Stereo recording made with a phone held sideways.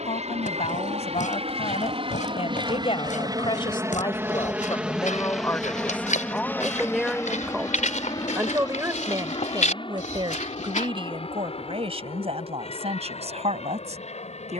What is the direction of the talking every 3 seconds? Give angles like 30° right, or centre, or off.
50° left, 30° left, 10° right, 40° right, 50° right.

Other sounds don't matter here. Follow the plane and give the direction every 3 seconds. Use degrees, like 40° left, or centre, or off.
50° right, 10° right, 20° left, 40° left, 50° left.